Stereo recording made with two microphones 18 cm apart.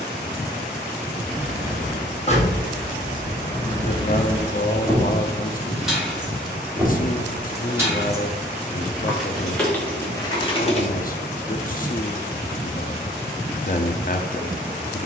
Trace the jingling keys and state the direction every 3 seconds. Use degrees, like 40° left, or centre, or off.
40° left, 10° left, 10° right, 10° left, off.